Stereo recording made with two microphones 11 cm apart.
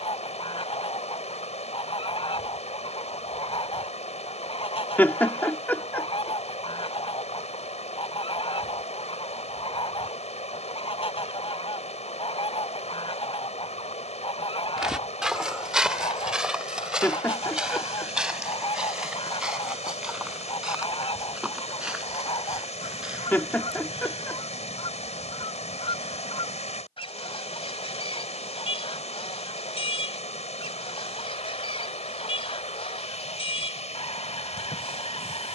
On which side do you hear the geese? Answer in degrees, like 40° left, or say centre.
60° left.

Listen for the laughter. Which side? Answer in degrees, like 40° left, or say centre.
20° left.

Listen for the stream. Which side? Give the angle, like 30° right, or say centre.
80° left.